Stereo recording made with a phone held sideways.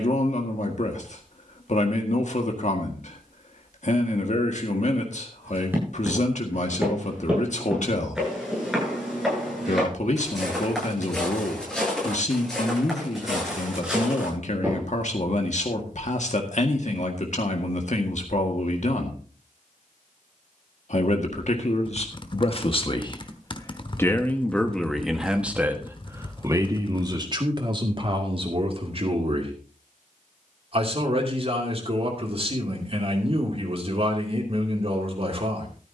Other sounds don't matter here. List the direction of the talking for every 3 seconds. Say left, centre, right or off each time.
left, left, left, left, left, left, left, left, centre, right, right, right.